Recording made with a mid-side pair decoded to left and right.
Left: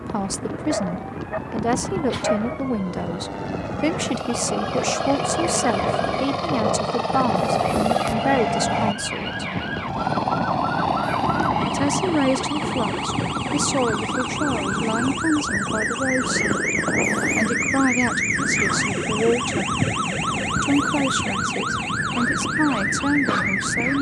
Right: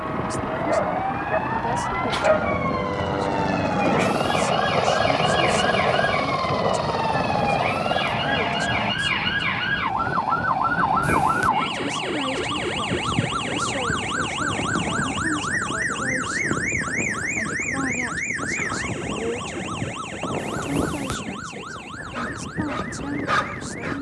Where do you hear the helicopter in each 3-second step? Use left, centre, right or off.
right, right, centre, left, left, left, left, left.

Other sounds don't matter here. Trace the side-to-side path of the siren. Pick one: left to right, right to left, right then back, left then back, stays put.
right to left.